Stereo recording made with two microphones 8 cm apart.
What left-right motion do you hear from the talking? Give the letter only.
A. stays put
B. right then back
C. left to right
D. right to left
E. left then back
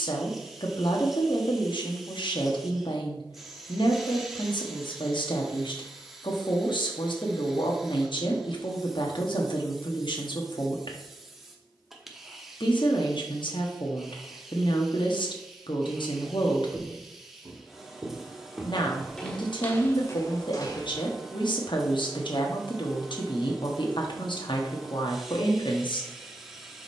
A.